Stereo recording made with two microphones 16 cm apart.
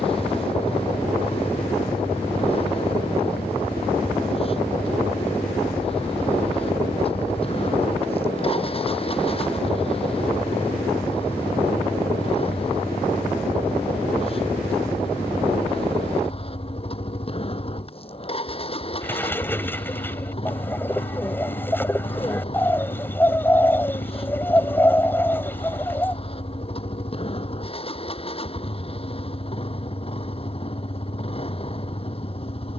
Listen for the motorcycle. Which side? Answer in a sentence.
In this clip you hear the motorcycle on the left.